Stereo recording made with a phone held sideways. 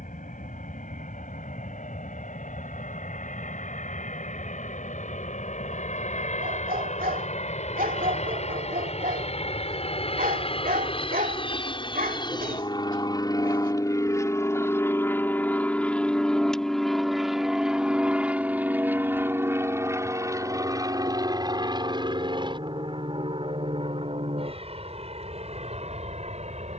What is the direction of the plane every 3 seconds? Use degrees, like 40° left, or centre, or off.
70° left, 60° left, 50° left, 40° left, 20° left, centre, 20° right, 30° right, 40° right.